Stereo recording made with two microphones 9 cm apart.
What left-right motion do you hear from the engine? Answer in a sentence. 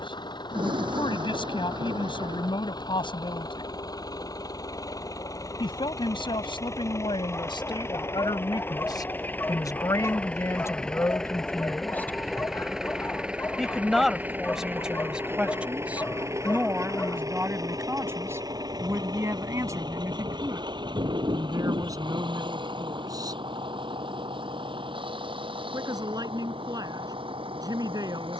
You can hear the engine move to the right.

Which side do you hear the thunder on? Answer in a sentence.
You can hear the thunder on the right.